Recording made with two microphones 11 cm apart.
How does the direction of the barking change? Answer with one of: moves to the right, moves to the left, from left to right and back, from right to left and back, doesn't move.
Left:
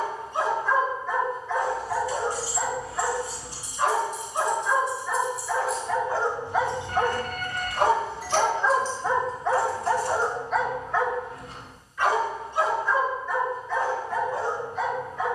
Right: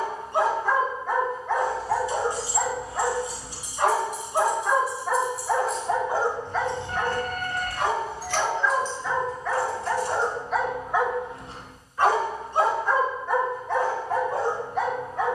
from right to left and back.